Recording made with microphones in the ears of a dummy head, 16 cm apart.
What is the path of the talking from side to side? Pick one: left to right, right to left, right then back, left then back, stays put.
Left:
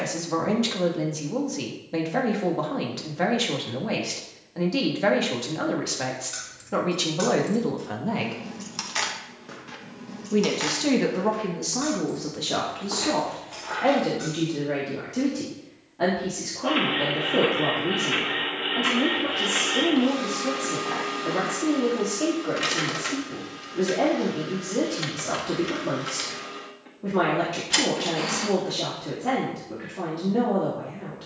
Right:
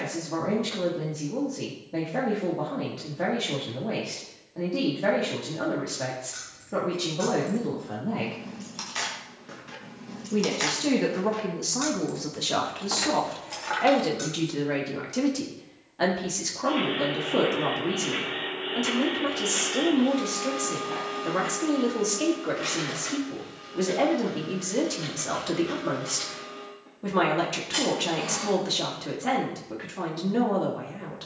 left to right.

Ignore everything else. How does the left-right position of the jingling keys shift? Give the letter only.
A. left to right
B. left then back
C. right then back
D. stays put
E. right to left
A.